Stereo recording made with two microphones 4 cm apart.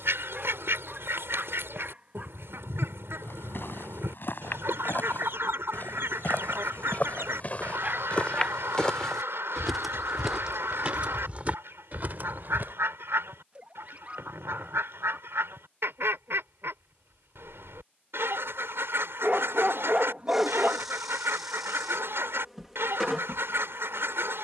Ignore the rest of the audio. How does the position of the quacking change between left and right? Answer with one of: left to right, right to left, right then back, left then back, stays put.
stays put.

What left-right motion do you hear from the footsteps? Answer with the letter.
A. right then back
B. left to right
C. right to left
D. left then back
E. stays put
B.